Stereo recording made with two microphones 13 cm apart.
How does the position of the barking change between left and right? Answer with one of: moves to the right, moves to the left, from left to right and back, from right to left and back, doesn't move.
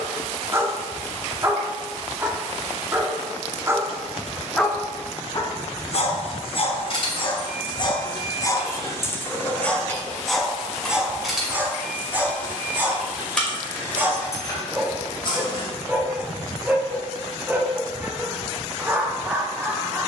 from right to left and back.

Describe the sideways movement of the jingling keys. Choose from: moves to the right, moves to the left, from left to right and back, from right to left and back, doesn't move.
from left to right and back.